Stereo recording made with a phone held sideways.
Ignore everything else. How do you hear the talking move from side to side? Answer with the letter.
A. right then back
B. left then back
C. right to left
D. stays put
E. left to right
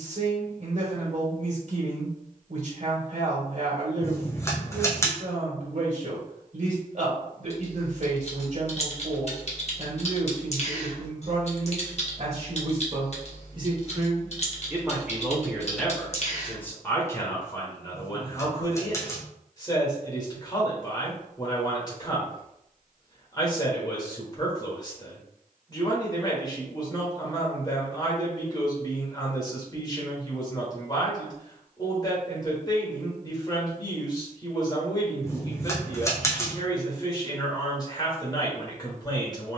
C.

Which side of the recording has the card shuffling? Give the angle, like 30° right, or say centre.
20° left.